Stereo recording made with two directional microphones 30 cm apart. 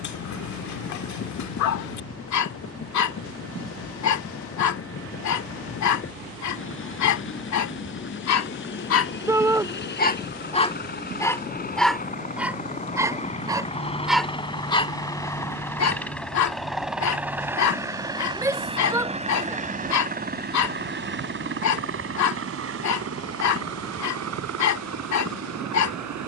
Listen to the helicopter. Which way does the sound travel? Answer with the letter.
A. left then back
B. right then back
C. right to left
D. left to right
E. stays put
D.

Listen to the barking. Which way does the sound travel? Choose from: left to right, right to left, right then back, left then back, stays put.
right then back.